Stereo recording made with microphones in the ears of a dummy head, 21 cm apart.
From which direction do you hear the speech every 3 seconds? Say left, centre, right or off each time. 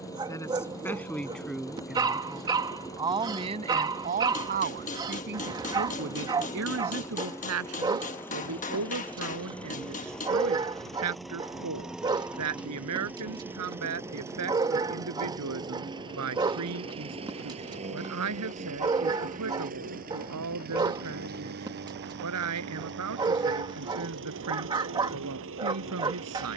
centre, right, right, right, right, right, right, right, right.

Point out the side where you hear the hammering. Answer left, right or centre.
left.